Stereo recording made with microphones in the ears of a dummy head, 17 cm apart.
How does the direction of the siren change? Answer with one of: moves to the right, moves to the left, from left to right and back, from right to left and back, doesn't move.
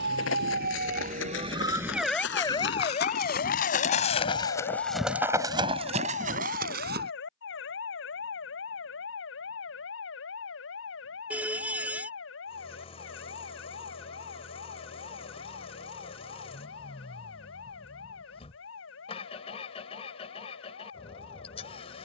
moves to the left.